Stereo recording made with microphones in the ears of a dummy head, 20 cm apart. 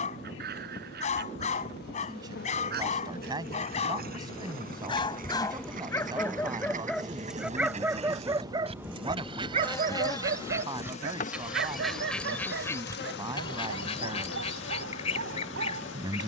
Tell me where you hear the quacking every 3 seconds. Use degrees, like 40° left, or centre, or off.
50° right, 50° right, 40° right, 10° right, 20° left, 30° left.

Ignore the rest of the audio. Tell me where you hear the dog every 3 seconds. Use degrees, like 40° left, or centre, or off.
30° left, 30° left, 10° right, 40° right, 60° right, 60° right.